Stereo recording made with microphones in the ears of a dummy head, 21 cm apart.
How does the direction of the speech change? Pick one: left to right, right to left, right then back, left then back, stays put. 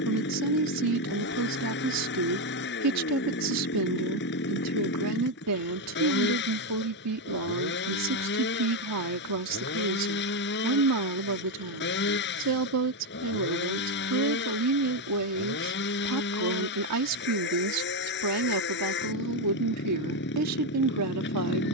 stays put.